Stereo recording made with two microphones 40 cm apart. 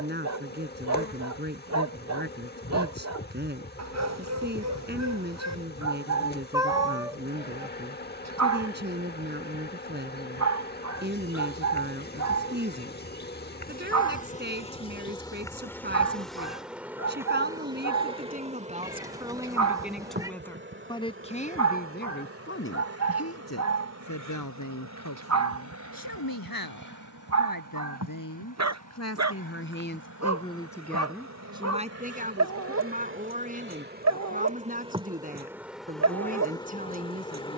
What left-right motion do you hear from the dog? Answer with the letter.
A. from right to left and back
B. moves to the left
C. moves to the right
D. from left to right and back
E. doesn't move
E.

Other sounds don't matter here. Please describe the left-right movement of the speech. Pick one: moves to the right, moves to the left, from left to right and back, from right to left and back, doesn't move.
from right to left and back.